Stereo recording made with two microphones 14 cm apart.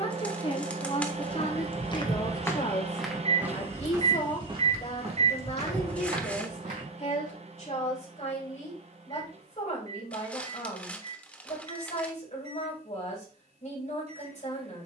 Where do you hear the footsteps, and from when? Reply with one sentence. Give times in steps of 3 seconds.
You can hear the footsteps on the left from 0 s, on the right from 3 s and not at all from 9 s.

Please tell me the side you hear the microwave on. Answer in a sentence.
You can hear the microwave on the right.